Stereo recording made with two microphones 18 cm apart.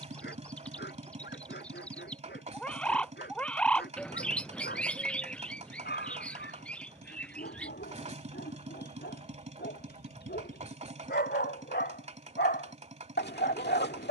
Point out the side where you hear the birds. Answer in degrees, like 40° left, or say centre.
10° left.